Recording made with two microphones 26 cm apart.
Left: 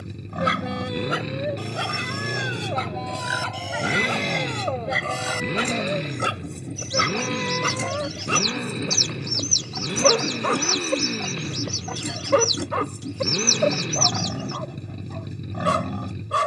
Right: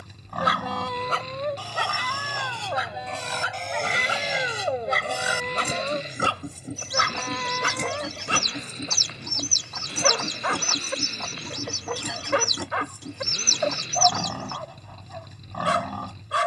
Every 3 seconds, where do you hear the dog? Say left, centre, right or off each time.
centre, centre, left, left, left, left.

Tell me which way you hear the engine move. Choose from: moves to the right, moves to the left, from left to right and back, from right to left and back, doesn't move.
doesn't move.